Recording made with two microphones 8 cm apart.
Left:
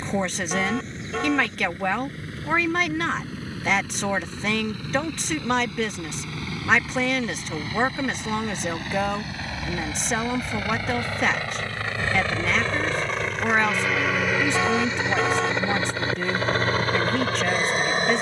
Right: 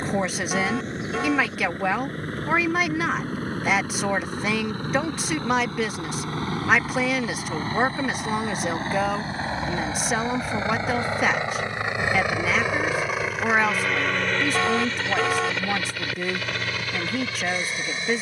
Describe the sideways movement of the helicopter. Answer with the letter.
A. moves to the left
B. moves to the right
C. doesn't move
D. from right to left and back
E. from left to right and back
A.